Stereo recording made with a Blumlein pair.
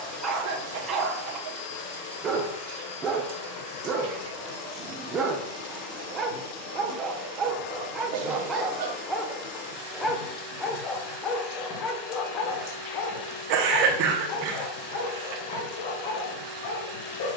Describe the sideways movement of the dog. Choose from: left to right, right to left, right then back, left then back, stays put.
right to left.